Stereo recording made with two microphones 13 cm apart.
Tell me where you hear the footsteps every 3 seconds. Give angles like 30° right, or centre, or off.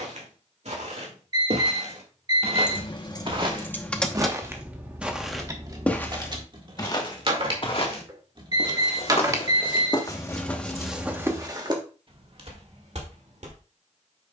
60° right, 20° right, 40° left, 10° left, 60° right.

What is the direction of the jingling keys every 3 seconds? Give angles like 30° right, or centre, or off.
40° left, centre, 40° right, centre, off.